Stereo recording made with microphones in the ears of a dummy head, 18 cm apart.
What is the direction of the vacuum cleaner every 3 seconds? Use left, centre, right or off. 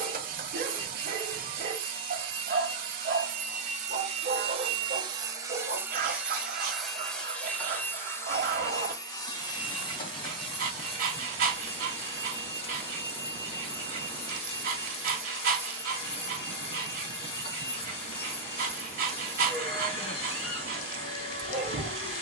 right, right, centre, left, left, left, left, left.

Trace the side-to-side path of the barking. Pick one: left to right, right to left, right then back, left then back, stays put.
stays put.